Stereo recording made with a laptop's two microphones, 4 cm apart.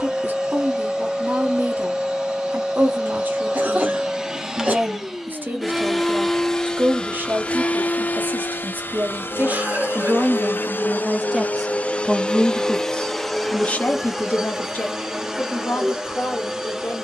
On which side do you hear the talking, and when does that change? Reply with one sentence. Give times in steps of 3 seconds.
You can hear the talking on the right from 0 s and on the left from 12 s.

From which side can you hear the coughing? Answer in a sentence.
In this clip you hear the coughing on the right.